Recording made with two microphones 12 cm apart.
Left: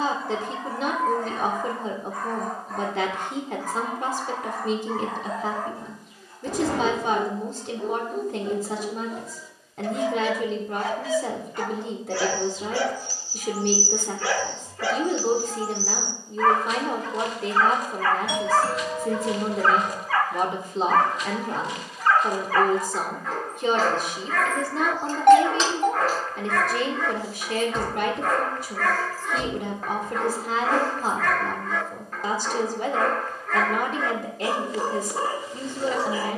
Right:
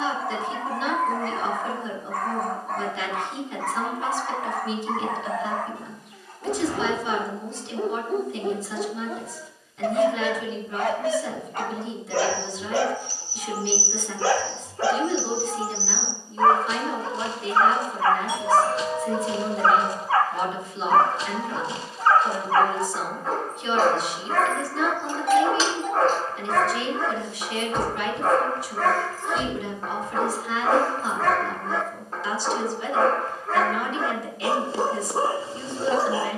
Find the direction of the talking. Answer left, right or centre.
left.